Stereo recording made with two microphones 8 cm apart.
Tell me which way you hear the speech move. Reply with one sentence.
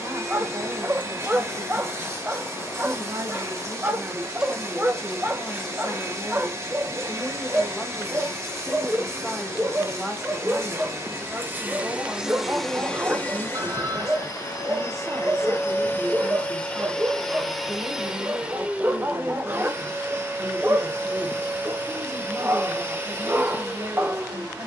In this clip you hear the speech go left and come back.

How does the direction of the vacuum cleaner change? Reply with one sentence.
In this clip you hear the vacuum cleaner move from right to left and back again.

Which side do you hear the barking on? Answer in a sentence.
You can hear the barking on the right.